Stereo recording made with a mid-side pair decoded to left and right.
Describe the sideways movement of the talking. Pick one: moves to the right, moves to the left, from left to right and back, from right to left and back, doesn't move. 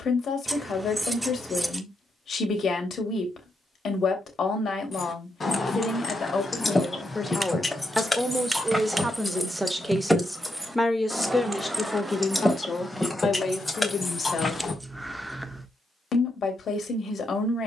from left to right and back.